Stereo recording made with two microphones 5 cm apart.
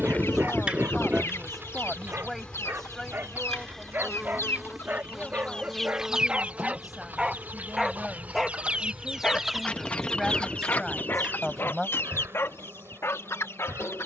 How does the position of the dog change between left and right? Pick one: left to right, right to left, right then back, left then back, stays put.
right to left.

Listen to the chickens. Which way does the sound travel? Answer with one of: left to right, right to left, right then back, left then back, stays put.
right then back.